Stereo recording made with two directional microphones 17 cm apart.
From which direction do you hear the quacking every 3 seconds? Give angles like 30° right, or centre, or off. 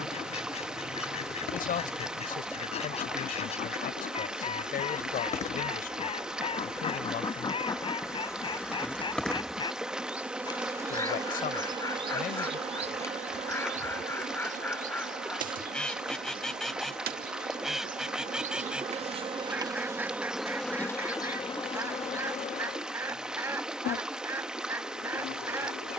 40° left, 40° left, 30° left, 20° left, 10° left, centre, 10° right, 20° right, 20° right.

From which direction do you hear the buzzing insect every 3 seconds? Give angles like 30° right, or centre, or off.
60° left, 50° left, 20° left, 10° right, 40° right, 60° right, 20° right, 40° left, 60° left.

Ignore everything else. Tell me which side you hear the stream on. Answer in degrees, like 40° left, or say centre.
centre.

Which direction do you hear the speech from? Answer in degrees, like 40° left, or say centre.
60° left.